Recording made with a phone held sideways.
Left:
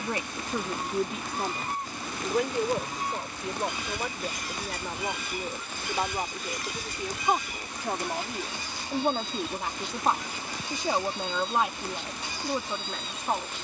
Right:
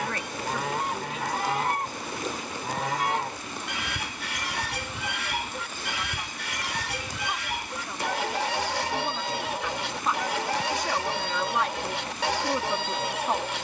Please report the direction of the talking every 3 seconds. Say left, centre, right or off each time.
left, left, left, left, centre.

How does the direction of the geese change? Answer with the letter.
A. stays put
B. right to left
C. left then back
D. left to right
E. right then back
A.